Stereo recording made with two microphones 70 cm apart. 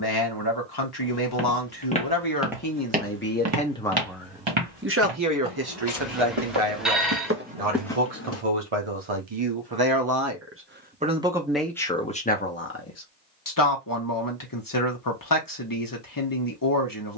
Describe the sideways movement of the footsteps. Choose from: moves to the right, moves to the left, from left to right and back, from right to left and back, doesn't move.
from left to right and back.